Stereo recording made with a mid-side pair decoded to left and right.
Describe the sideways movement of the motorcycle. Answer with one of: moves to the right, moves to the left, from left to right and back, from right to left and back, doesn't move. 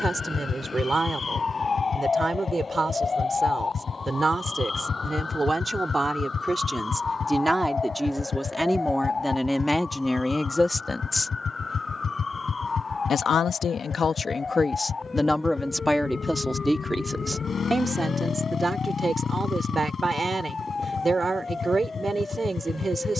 doesn't move.